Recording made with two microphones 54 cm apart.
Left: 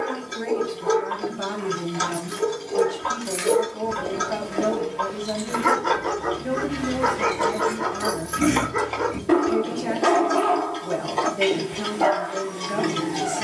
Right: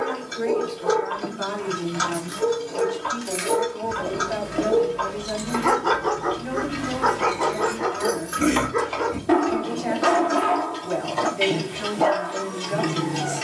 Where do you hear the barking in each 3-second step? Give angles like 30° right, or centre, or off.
50° right, 20° left, 30° left, 40° right, 60° right.